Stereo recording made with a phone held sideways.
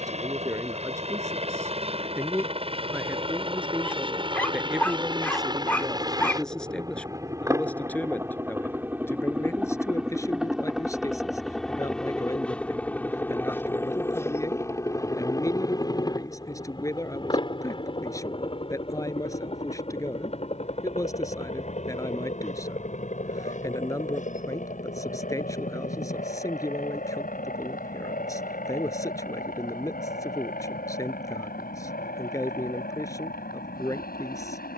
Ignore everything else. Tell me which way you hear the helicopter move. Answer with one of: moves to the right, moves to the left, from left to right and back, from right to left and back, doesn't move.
moves to the left.